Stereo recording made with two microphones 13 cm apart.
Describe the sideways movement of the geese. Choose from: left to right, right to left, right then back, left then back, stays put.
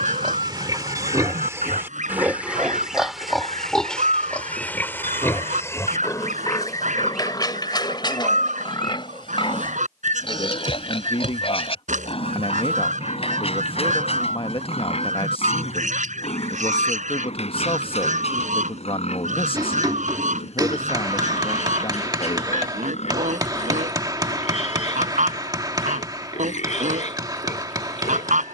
stays put.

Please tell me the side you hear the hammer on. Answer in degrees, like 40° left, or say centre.
30° right.